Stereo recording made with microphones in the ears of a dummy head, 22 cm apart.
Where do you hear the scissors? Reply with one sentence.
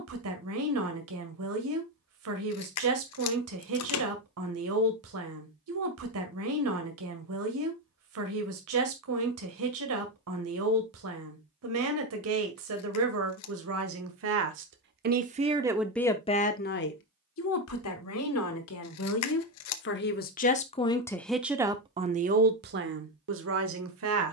In this clip you hear the scissors on the left.